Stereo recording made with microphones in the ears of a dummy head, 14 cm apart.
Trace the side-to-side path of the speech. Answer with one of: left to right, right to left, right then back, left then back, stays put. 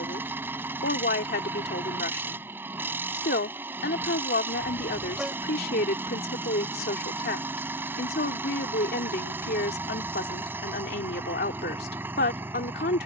stays put.